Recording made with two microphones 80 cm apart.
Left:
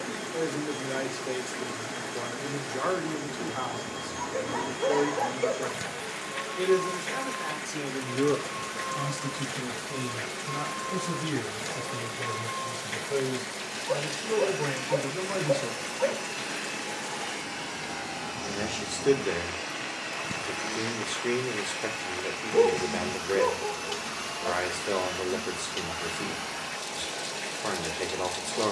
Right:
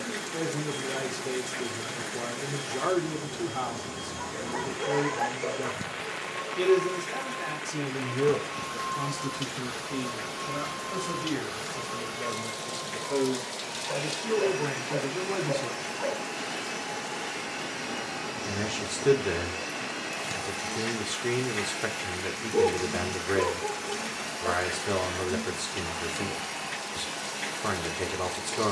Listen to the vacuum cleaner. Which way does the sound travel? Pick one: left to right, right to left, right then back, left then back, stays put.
right to left.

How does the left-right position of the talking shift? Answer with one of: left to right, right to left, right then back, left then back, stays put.
left then back.